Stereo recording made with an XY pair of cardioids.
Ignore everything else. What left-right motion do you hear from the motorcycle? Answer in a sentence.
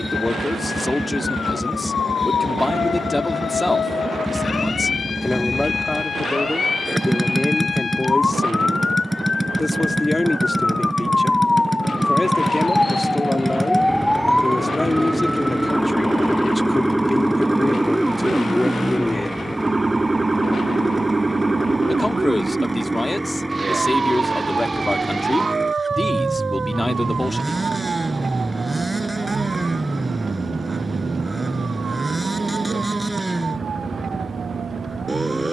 In this clip you hear the motorcycle stay in one place.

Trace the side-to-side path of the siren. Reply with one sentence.
In this clip you hear the siren move to the right.